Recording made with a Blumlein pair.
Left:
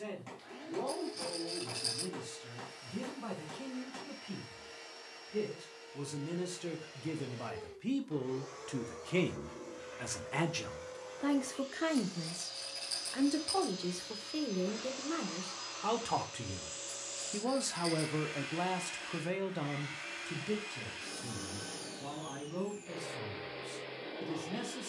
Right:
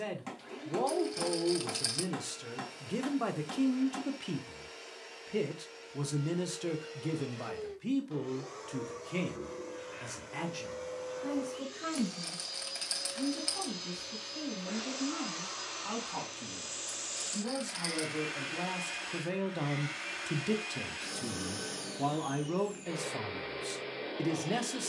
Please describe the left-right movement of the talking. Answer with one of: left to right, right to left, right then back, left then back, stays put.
left then back.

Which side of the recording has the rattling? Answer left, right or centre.
right.